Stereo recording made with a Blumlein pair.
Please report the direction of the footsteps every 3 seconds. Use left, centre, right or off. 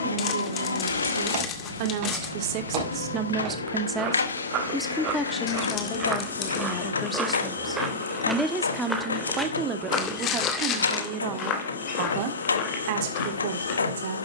right, right, centre, left, left.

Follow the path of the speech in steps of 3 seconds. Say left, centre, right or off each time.
right, centre, centre, right, right.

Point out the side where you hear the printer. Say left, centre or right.
left.